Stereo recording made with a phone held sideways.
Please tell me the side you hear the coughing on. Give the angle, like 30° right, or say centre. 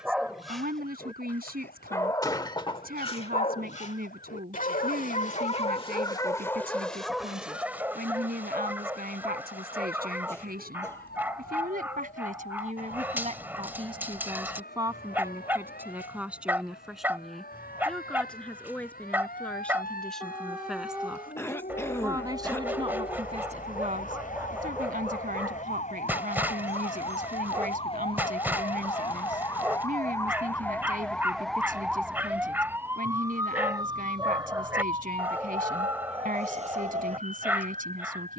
20° left.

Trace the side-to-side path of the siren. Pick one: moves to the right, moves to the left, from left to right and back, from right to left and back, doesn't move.
moves to the right.